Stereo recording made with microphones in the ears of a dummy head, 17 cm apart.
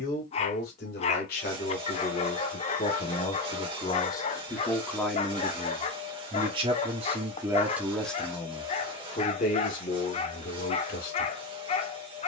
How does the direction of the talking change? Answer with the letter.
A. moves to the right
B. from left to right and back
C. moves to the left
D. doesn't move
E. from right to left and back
B.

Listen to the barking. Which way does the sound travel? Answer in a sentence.
In this clip you hear the barking stay put.